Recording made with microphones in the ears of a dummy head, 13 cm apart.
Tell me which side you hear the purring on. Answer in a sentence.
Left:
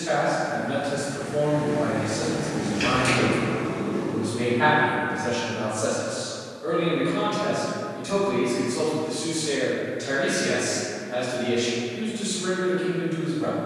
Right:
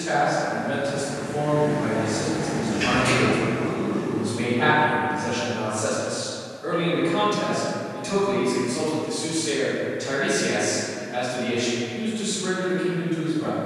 In this clip you hear the purring on the left.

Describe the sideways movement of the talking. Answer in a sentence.
You can hear the talking move from left to right and back again.